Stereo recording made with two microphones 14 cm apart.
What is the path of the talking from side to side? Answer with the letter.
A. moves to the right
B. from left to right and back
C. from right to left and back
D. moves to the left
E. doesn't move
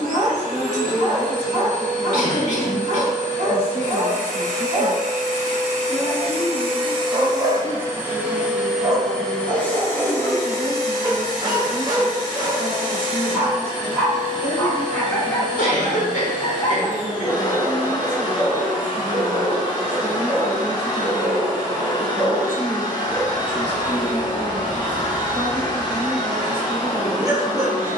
B.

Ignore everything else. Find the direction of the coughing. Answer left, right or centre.
left.